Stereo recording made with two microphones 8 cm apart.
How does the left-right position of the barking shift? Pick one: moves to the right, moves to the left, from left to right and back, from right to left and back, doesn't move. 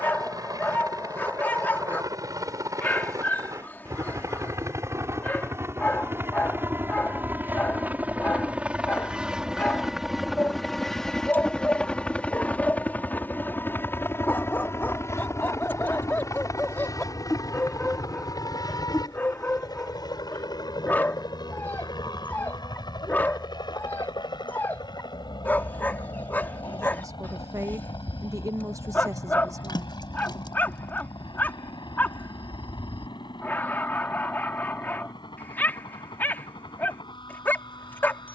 doesn't move.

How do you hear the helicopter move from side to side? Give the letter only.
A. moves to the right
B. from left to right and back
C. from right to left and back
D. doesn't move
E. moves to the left
E.